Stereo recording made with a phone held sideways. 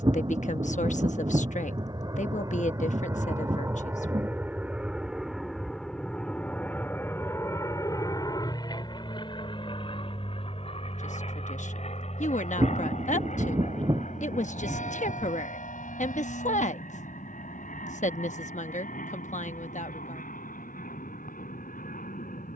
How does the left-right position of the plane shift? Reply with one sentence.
You can hear the plane move to the left.